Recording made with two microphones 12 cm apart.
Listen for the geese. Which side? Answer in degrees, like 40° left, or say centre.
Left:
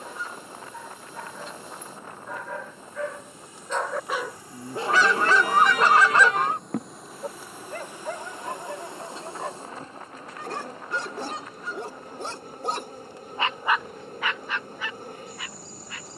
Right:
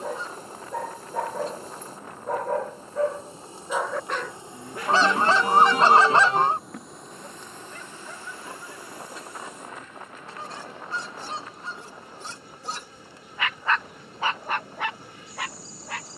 30° right.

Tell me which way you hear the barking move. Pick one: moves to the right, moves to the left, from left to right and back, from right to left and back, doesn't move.
from right to left and back.